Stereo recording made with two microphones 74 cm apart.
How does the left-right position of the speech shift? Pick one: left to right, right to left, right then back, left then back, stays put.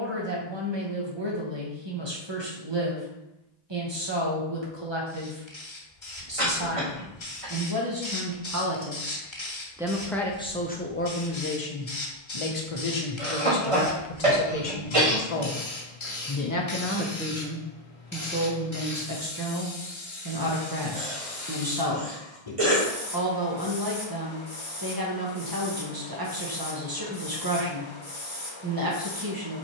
left then back.